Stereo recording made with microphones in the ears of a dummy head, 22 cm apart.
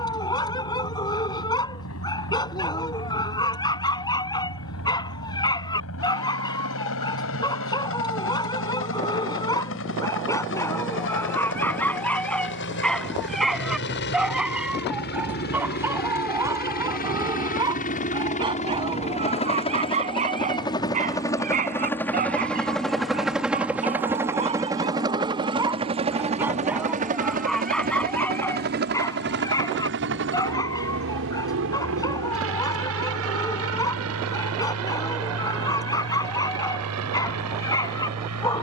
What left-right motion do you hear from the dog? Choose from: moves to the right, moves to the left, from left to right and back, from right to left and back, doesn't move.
from left to right and back.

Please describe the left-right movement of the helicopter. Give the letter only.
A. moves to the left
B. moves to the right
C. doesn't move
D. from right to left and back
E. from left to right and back
B.